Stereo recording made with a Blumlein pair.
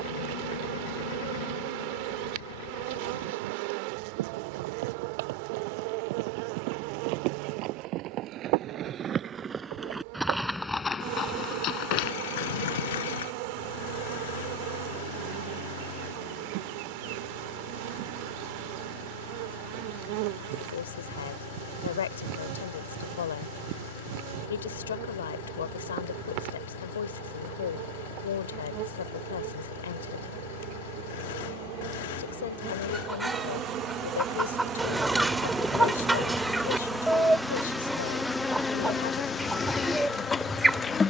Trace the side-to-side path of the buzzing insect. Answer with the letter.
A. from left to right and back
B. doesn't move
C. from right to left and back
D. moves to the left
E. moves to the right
D.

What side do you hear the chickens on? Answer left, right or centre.
centre.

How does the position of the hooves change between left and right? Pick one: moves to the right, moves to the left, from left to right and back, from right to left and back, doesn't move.
moves to the left.